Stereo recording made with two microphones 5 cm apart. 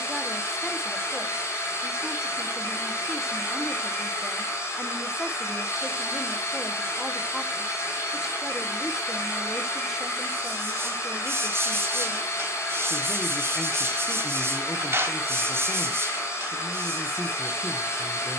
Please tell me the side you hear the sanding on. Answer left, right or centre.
right.